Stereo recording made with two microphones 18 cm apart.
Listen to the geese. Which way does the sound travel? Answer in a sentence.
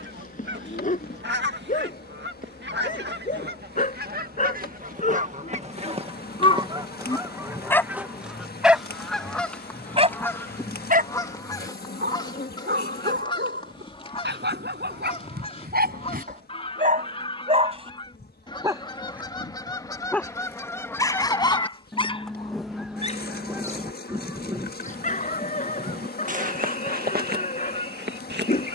You can hear the geese go left and come back.